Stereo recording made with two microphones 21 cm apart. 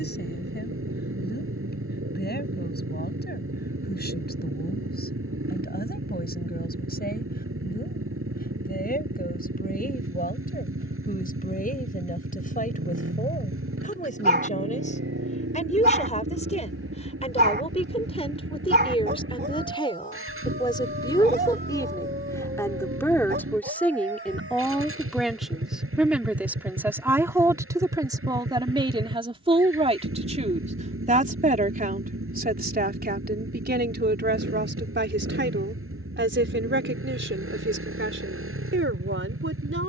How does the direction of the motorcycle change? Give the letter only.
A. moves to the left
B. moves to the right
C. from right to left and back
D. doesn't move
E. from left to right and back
D.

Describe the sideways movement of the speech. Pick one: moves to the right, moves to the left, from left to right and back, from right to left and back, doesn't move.
moves to the right.